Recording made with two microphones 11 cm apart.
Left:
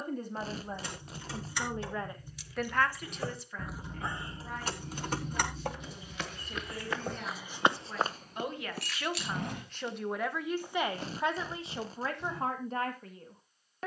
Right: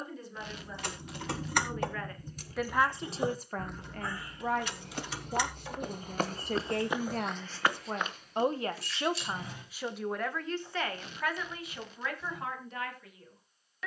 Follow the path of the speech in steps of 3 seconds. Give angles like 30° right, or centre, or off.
30° left, 60° right, 60° right, 10° left, 40° left.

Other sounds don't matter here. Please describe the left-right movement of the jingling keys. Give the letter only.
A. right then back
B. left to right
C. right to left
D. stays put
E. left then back
C.